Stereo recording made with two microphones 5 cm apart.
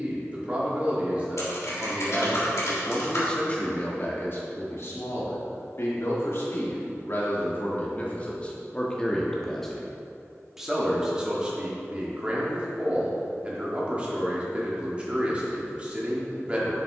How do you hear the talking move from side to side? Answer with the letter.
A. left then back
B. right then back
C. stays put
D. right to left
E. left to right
A.